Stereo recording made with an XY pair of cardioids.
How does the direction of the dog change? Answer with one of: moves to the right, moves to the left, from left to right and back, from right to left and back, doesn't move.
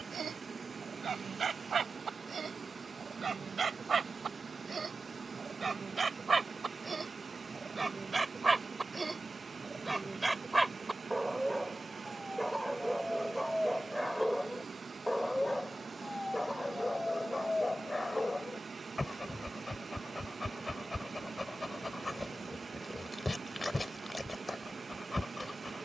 moves to the left.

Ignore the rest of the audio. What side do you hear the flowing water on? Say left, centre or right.
right.